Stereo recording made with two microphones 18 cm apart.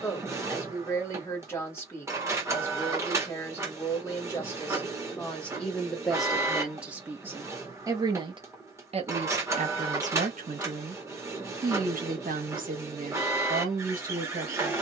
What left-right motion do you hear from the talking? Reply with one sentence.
You can hear the talking travel towards the right.